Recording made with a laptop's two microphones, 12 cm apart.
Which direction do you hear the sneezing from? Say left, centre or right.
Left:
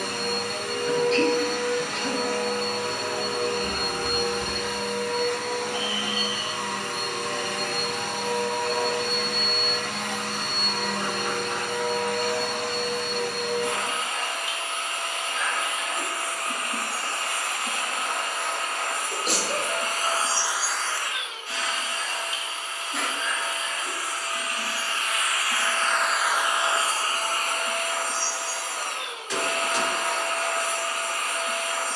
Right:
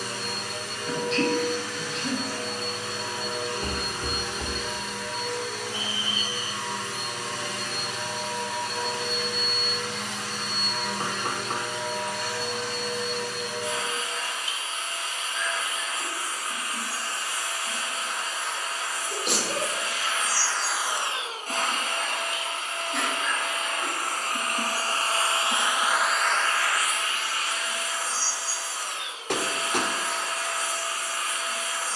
centre.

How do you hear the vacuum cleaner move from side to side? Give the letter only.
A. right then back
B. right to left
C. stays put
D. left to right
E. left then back
A.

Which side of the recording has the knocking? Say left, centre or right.
right.